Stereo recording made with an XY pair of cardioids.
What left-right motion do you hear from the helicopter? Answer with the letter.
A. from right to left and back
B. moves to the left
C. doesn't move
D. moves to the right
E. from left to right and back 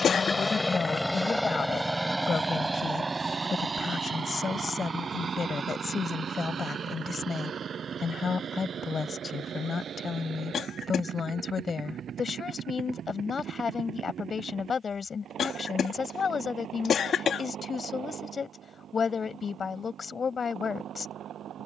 D.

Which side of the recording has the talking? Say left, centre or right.
left.